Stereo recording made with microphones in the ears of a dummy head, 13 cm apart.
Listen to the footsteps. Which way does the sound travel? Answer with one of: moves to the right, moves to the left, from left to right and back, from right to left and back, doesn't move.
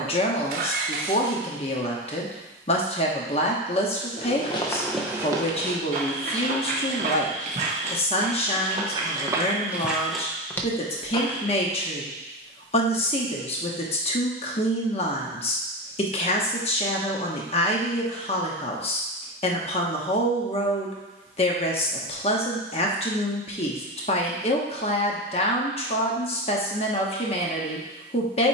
from left to right and back.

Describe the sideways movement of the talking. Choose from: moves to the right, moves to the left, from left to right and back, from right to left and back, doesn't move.
doesn't move.